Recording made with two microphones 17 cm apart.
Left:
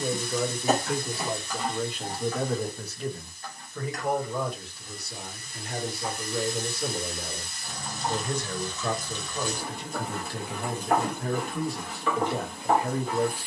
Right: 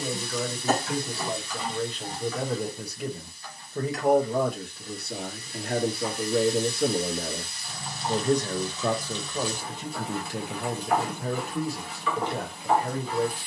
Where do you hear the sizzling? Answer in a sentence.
In this clip you hear the sizzling on the left.